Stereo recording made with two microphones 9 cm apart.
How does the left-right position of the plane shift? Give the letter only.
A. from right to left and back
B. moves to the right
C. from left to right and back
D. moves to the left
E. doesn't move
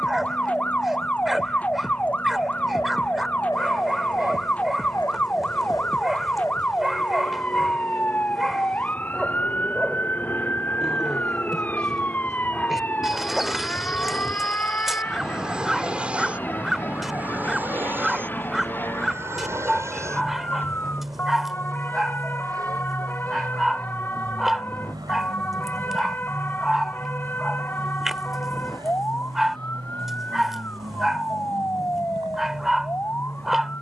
B.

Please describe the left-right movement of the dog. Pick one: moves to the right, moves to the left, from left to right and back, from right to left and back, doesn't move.
doesn't move.